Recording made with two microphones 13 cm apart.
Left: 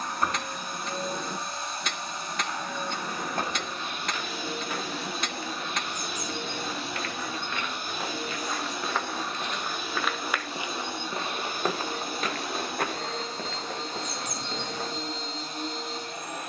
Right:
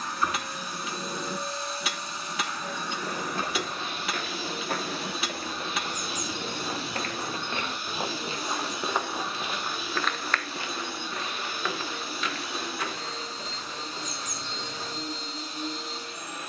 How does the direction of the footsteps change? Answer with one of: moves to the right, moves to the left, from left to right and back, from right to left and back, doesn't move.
moves to the left.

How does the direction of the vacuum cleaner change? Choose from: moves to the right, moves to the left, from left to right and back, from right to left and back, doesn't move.
doesn't move.